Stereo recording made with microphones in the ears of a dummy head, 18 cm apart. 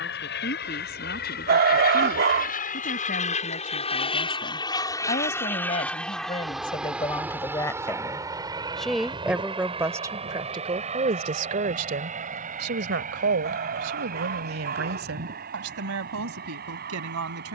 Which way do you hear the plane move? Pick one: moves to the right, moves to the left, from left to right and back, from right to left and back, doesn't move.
moves to the right.